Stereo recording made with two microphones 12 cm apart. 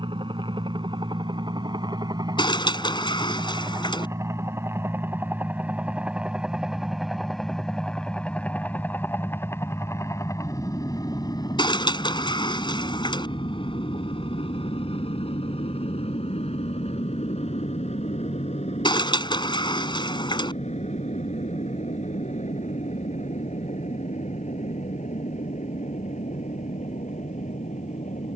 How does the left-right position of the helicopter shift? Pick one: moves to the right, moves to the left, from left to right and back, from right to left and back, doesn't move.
moves to the left.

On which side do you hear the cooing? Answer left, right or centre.
left.